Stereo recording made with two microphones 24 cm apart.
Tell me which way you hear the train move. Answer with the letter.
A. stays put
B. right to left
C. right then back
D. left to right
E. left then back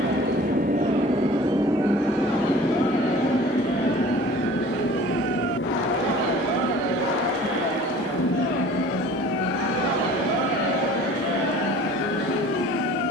B.